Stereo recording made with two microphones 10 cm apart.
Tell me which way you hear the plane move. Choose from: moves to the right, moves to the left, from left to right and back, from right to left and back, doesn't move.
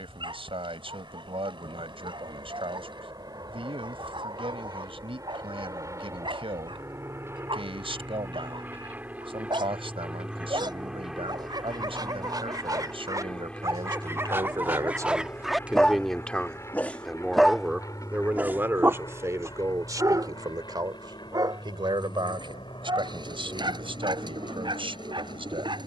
moves to the left.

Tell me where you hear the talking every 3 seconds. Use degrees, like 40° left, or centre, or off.
60° right, 60° right, 60° right, 60° right, 50° right, 10° right, 30° right, 50° right, 60° right.